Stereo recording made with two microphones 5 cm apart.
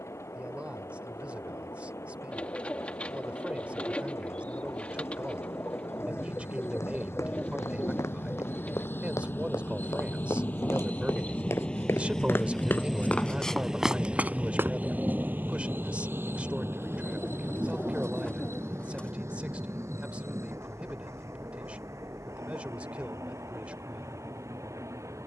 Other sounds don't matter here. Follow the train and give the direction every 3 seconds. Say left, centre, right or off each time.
left, left, left, left, centre, right, right, right, right.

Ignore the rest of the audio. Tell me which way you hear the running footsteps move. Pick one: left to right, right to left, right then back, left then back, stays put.
left to right.